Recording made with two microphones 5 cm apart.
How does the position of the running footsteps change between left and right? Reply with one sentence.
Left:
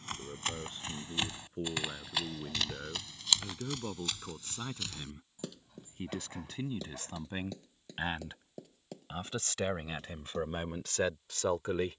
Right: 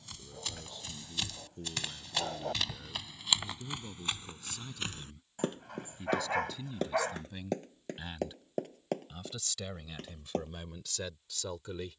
In this clip you hear the running footsteps move from left to right.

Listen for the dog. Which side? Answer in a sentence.
In this clip you hear the dog on the right.